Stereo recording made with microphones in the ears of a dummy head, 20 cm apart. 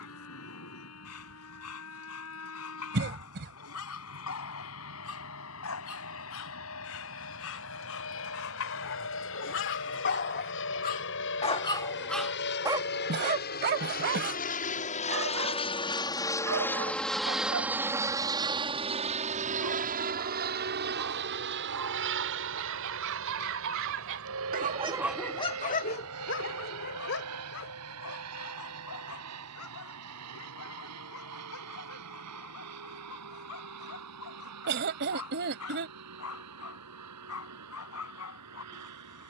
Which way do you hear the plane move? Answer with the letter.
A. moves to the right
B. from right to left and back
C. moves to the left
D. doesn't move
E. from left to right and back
A.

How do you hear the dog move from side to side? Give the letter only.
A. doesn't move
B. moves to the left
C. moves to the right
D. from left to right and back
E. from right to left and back
D.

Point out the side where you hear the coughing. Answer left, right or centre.
right.